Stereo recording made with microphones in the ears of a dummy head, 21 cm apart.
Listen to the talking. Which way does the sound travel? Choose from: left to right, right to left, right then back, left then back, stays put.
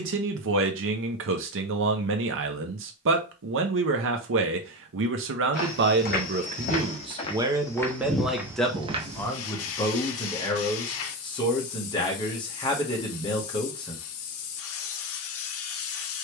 right to left.